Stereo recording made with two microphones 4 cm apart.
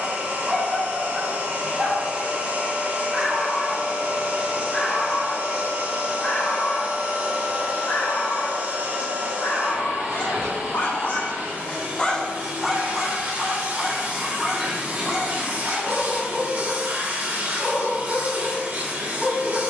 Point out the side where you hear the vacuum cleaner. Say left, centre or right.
right.